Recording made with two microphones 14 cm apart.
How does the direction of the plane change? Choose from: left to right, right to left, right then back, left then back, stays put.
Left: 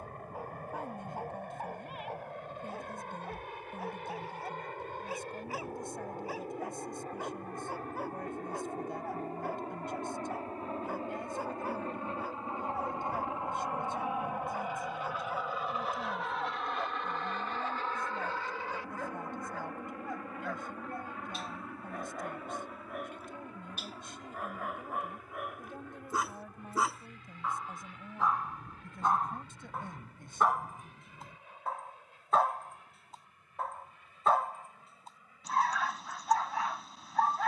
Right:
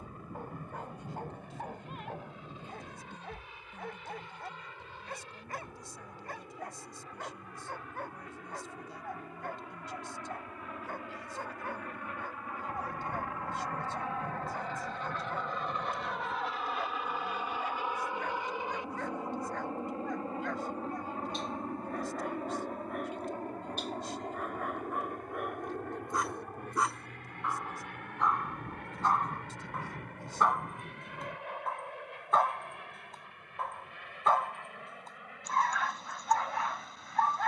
left to right.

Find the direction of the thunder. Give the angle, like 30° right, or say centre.
50° right.